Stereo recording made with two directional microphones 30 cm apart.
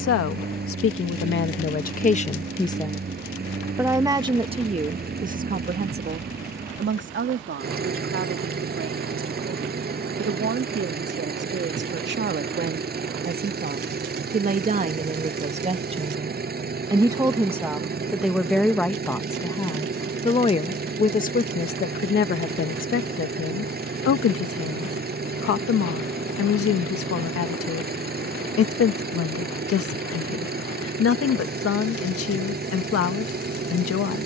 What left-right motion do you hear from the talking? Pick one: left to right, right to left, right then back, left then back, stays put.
right then back.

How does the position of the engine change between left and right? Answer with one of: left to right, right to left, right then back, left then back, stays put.
stays put.